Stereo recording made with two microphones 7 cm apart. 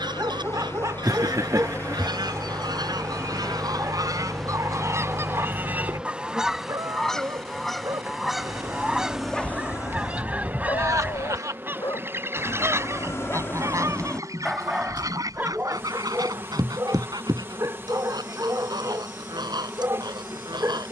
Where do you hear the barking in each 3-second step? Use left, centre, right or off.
right, right, right, left, left, right, right.